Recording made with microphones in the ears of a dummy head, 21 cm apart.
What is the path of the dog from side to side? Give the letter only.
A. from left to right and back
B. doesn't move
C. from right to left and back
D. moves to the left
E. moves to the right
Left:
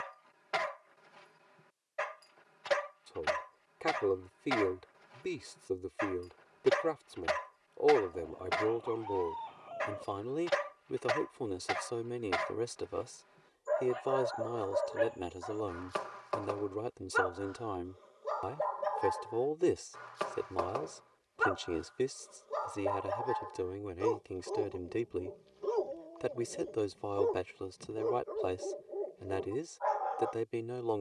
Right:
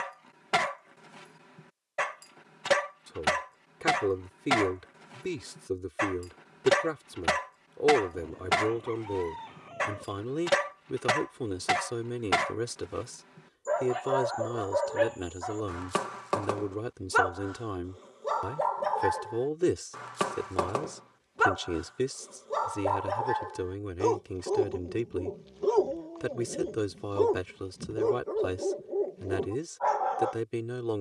B.